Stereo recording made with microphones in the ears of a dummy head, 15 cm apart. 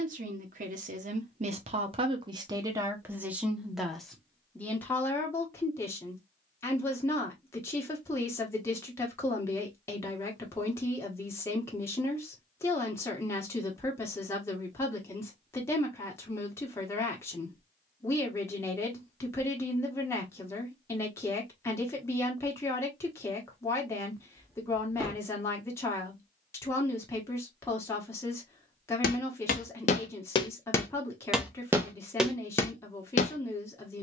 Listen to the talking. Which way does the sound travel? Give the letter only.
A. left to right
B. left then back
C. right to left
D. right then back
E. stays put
C.